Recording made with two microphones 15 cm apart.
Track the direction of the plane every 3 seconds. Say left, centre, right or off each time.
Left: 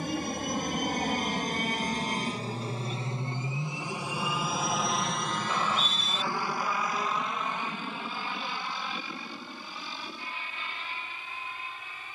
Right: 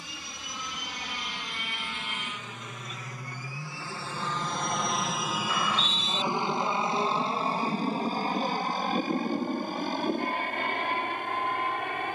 left, centre, right, right.